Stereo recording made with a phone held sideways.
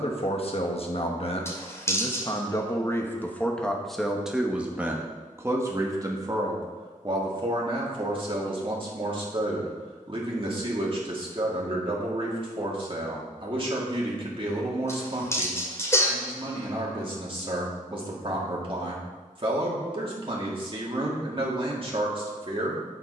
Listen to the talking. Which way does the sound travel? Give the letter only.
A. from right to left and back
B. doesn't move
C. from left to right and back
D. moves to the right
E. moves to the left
D.